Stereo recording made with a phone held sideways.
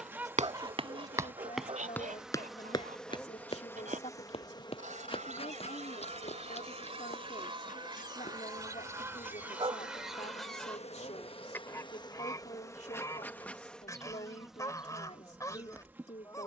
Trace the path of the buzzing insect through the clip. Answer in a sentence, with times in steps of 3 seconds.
In this clip you hear the buzzing insect in the centre from 0 s, on the left from 3 s and in the centre from 12 s.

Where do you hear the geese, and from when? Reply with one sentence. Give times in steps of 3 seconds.
In this clip you hear the geese on the right from 0 s, in the centre from 9 s and on the left from 12 s.